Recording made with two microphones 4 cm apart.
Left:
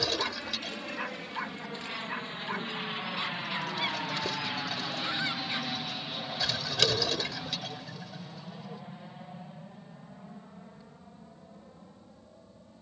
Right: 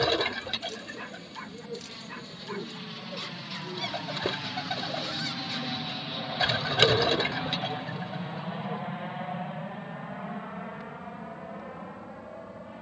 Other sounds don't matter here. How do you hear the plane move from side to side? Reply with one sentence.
In this clip you hear the plane move from left to right.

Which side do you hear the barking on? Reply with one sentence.
In this clip you hear the barking on the left.